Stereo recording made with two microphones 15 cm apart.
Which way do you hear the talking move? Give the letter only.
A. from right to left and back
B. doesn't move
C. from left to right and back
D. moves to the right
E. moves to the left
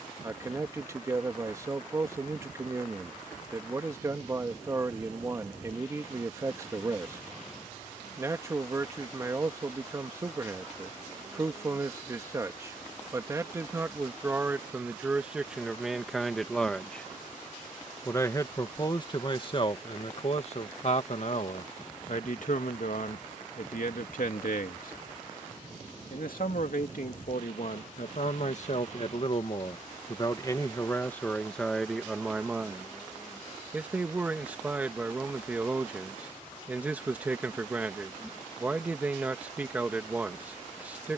A.